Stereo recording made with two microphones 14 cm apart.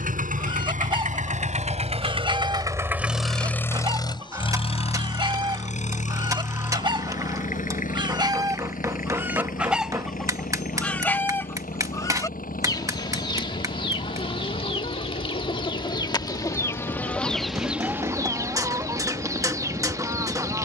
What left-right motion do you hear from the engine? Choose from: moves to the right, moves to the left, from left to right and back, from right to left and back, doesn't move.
moves to the left.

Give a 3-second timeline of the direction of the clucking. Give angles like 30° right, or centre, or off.
30° right, 30° right, 30° right, centre, 30° left, 20° left, 20° right.